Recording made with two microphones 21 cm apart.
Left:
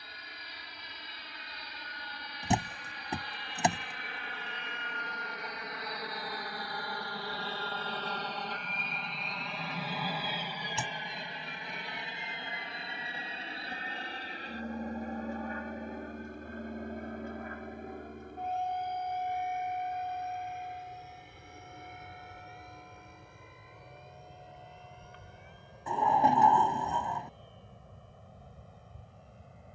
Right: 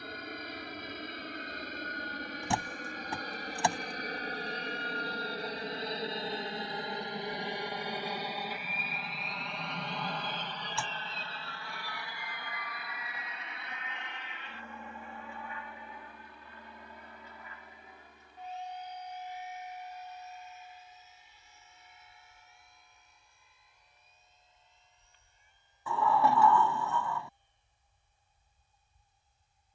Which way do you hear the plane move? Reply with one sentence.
In this clip you hear the plane go from the right side to the left.